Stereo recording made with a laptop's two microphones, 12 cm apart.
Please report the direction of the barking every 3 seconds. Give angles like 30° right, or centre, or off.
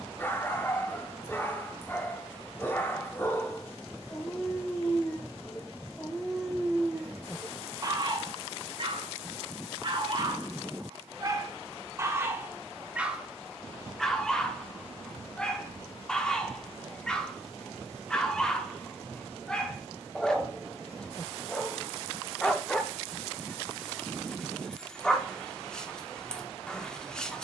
20° left, 20° left, 20° right, 40° right, 10° right, 10° left, 10° left, 10° left, 10° left.